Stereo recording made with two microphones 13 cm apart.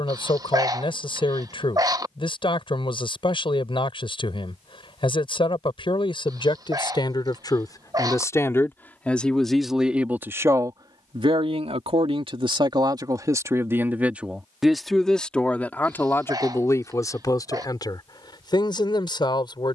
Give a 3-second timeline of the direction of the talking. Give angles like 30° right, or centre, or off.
40° left, 40° left, 30° left, 20° right, 20° right, 20° left, 40° left.